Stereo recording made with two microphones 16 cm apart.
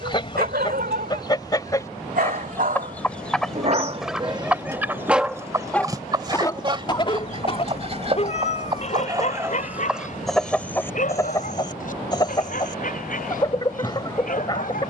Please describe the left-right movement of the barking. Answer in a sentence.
In this clip you hear the barking go from the right side to the left.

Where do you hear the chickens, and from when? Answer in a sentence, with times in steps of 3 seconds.
You can hear the chickens on the left from 0 s, in the centre from 3 s, on the right from 6 s, in the centre from 9 s and on the left from 12 s.